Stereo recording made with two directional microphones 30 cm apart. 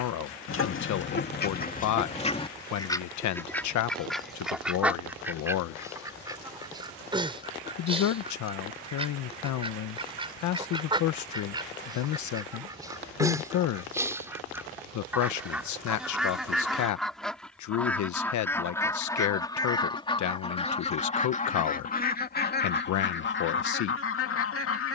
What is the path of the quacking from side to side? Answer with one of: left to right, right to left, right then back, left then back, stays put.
right then back.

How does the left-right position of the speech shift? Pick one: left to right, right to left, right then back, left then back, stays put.
stays put.